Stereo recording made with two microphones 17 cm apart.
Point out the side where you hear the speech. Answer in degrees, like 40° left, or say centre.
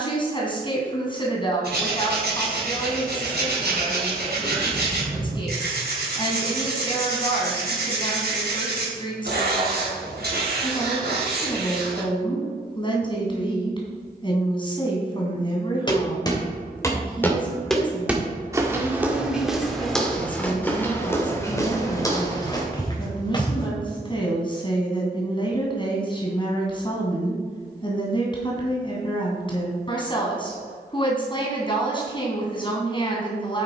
30° left.